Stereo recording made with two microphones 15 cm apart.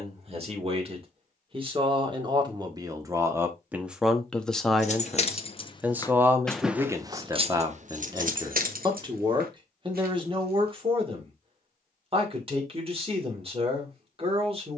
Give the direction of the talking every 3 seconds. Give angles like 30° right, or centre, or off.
30° right, 10° right, 20° right, 30° right, 40° right.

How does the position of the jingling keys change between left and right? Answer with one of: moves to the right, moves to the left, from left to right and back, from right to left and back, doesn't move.
moves to the right.